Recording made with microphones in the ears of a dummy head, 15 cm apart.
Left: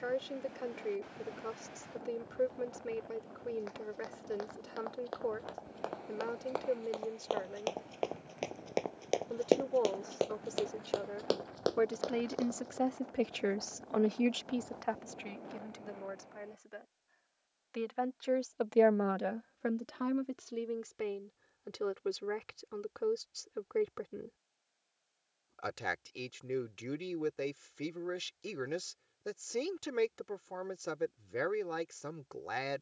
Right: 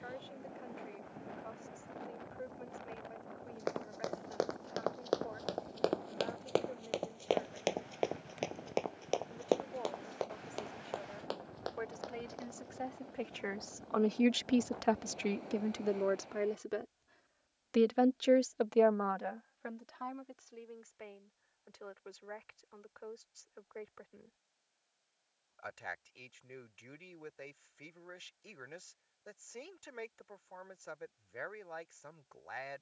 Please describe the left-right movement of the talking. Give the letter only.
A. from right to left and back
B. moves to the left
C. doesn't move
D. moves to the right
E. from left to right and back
E.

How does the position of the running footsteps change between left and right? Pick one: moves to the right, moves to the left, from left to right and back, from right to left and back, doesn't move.
moves to the left.